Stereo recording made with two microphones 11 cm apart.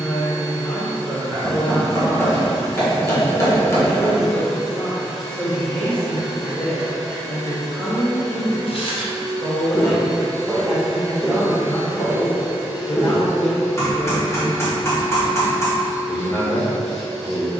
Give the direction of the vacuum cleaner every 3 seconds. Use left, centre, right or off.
right, right, right, right, centre, centre.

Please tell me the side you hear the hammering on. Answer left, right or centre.
left.